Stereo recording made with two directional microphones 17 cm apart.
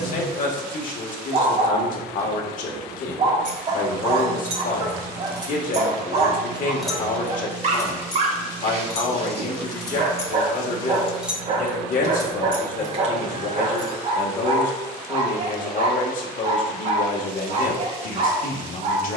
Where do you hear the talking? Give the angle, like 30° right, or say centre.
50° left.